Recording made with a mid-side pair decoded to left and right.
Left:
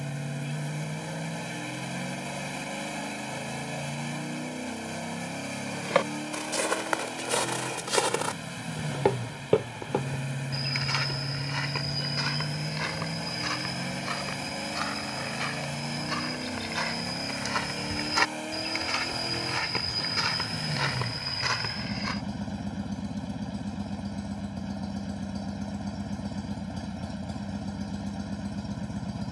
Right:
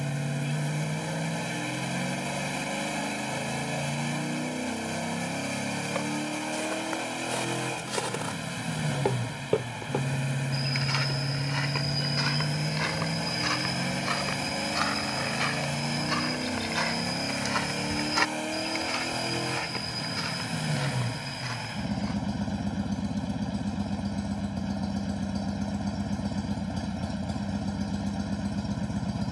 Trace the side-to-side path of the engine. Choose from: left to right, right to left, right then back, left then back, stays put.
stays put.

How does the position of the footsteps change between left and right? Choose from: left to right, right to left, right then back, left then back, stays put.
right then back.